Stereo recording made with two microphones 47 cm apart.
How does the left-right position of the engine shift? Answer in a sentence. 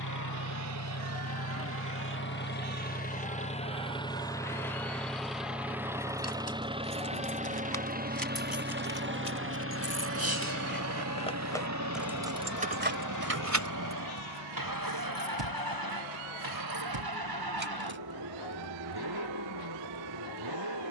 In this clip you hear the engine travel towards the right.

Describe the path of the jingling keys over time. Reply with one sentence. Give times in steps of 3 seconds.
You can hear the jingling keys not at all from 0 s, on the left from 6 s, on the right from 12 s and not at all from 18 s.